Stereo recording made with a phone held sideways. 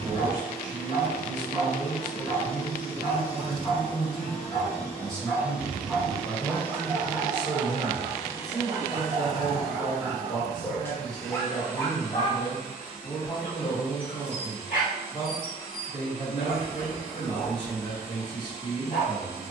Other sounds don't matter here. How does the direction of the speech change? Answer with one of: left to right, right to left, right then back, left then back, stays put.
right to left.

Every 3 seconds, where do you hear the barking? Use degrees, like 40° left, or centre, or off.
60° left, 30° left, 20° right, centre, 50° left, 60° left, 60° left.